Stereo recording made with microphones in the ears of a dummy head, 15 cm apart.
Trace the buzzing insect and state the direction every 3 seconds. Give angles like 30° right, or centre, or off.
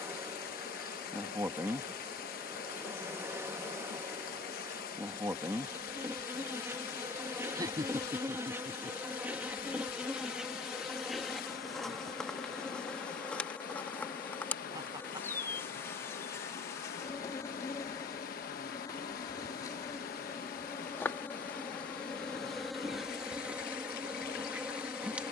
20° right, 20° right, 10° right, centre, 10° left, 20° left, 20° left, centre, 10° right.